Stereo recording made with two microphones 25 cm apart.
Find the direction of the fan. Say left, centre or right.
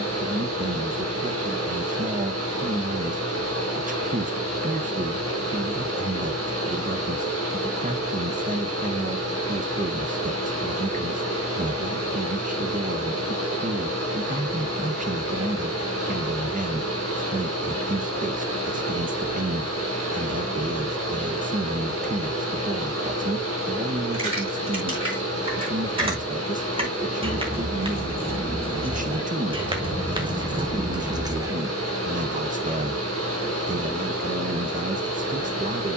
right.